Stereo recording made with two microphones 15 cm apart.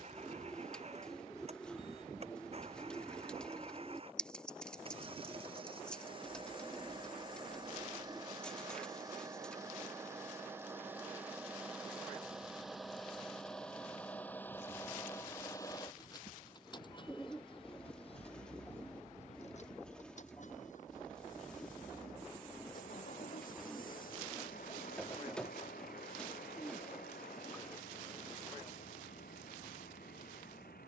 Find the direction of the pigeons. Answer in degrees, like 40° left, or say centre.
10° left.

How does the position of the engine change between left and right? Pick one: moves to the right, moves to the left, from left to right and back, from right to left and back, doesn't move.
moves to the left.